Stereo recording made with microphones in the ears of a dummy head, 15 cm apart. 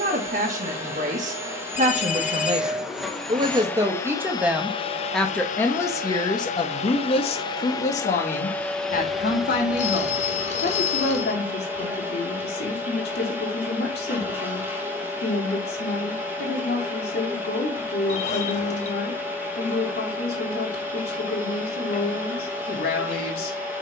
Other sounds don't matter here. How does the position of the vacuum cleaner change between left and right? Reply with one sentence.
In this clip you hear the vacuum cleaner go left and come back.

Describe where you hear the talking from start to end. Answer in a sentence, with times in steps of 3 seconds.
In this clip you hear the talking on the right from 0 s, in the centre from 3 s and on the left from 6 s.